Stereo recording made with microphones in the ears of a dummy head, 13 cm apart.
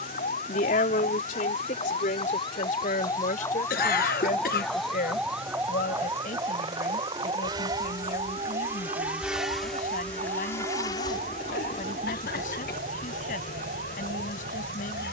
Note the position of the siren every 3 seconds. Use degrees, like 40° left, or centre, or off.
40° left, 10° left, 30° right, 50° right, 60° right.